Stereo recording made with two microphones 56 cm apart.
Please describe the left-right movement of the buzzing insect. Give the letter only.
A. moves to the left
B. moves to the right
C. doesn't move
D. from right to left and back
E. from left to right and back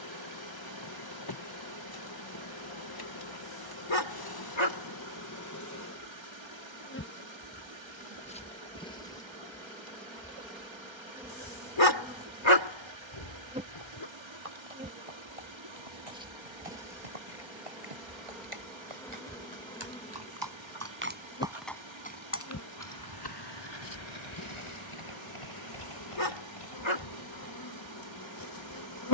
E.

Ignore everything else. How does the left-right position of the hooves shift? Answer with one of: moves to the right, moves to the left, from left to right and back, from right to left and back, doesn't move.
moves to the left.